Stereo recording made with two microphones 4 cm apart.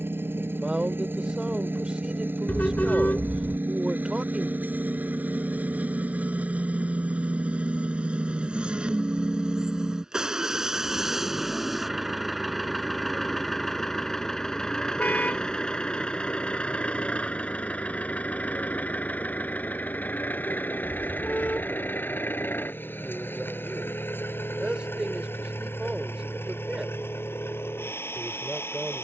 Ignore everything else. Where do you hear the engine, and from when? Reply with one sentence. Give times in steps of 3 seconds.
In this clip you hear the engine on the right from 0 s, in the centre from 9 s and on the left from 15 s.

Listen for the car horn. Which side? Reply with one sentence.
In this clip you hear the car horn on the left.